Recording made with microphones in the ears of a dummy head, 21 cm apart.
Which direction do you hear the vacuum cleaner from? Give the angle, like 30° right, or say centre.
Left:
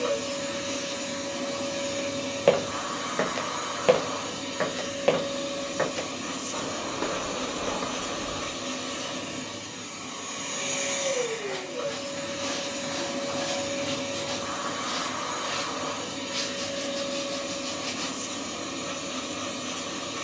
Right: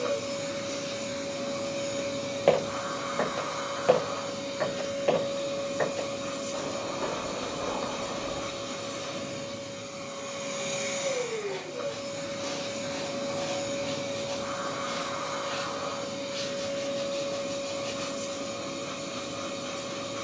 10° left.